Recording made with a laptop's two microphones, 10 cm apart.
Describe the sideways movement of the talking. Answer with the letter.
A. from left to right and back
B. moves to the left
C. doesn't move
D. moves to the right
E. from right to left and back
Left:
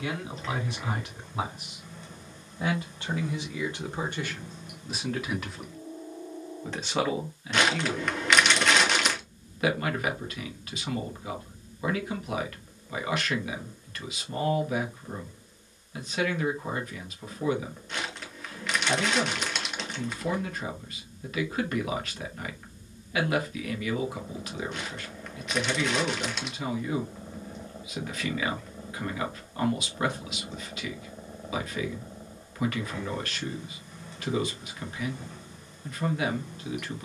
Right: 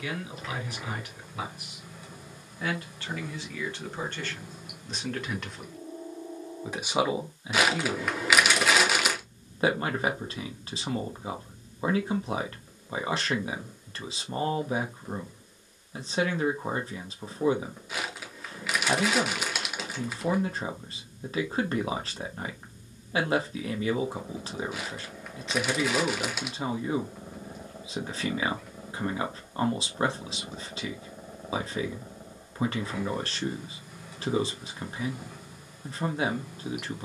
D.